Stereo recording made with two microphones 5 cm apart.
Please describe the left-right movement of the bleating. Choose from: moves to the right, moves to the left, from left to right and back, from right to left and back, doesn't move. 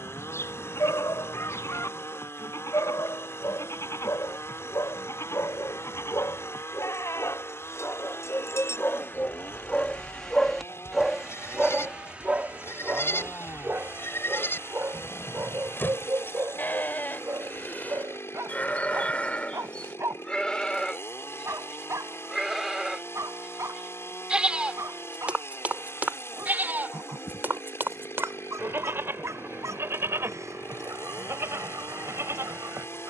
moves to the right.